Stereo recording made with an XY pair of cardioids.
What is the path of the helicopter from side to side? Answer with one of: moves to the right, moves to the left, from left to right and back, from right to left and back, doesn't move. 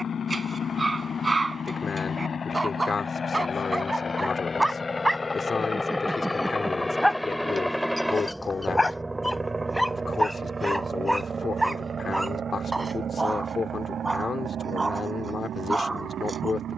moves to the right.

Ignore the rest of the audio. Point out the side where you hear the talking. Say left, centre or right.
left.